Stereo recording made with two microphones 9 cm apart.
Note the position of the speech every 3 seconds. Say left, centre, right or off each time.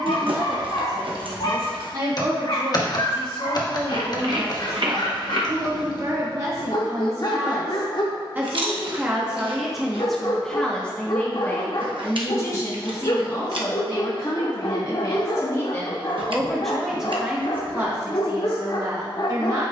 right, right, right, centre, left, centre, right.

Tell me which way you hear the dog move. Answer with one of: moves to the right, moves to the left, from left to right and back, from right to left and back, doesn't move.
doesn't move.